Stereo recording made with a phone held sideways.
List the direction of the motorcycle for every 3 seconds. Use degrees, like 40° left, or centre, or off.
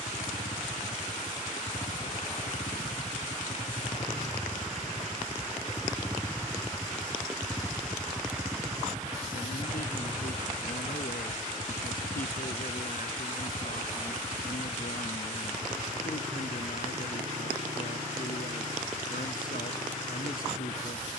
60° left, 40° left, centre, 30° right, 40° right, 50° right, 60° right.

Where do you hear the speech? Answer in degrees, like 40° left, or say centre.
80° left.